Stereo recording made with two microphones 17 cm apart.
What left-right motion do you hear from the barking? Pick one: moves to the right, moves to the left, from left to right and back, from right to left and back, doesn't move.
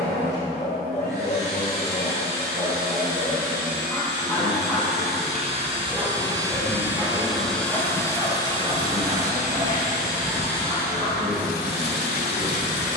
moves to the right.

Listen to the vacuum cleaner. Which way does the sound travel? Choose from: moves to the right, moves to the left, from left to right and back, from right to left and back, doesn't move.
moves to the left.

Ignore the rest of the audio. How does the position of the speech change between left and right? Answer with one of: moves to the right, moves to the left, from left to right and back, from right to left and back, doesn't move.
doesn't move.